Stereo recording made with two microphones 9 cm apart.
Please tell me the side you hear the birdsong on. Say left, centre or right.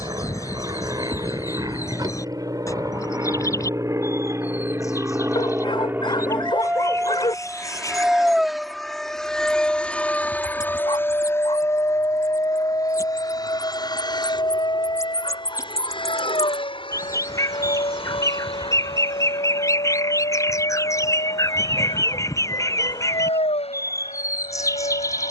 left.